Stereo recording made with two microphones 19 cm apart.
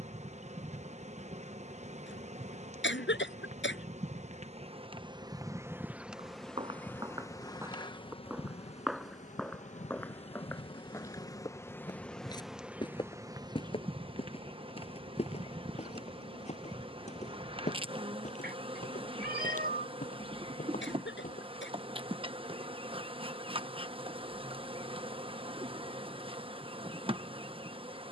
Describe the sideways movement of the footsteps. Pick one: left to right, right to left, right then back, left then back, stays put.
right to left.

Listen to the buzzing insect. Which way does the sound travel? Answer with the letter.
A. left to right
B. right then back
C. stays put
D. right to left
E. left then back
E.